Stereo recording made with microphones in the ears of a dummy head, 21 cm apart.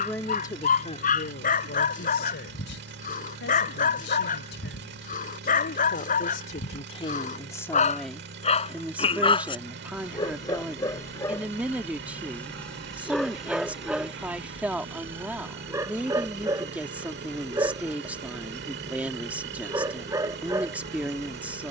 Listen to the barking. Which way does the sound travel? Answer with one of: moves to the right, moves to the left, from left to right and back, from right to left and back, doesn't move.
moves to the right.